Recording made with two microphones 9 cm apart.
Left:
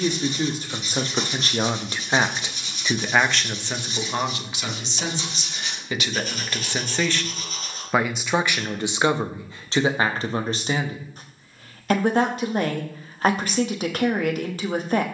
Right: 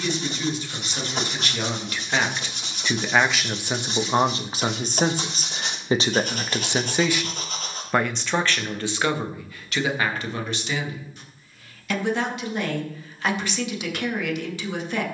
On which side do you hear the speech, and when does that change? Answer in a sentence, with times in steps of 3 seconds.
In this clip you hear the speech on the left from 0 s, on the right from 3 s, in the centre from 6 s and on the left from 9 s.